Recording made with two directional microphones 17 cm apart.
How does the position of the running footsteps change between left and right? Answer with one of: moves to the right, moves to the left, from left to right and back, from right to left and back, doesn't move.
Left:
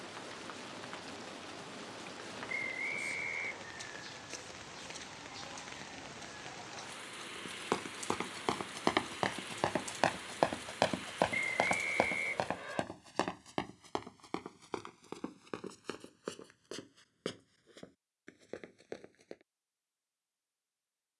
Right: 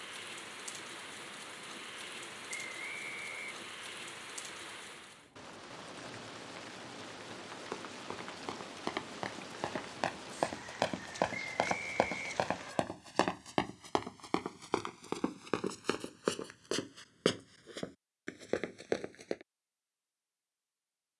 moves to the right.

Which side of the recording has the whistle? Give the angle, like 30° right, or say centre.
30° left.